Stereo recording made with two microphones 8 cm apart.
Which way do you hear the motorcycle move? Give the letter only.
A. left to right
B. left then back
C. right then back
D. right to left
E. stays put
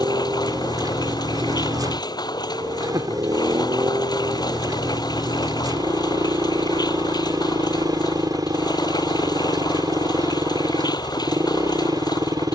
E.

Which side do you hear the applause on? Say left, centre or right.
left.